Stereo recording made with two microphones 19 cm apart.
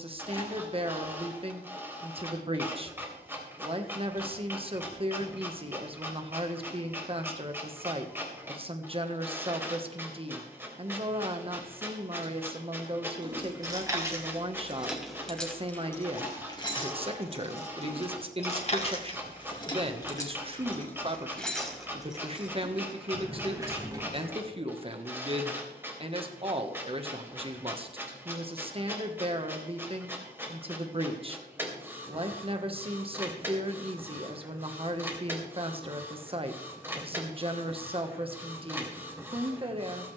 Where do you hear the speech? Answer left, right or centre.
right.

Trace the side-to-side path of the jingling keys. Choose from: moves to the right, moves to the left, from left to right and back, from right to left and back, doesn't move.
from right to left and back.